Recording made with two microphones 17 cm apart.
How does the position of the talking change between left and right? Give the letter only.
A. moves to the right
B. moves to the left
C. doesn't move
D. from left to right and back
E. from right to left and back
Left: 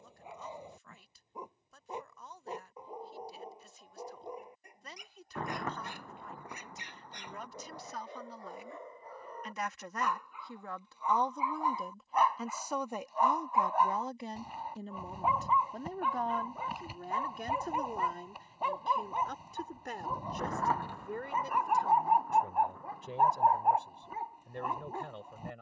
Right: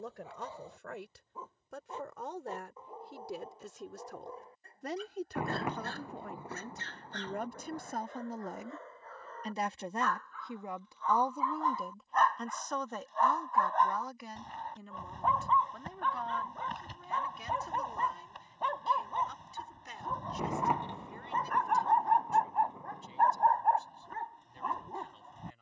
B.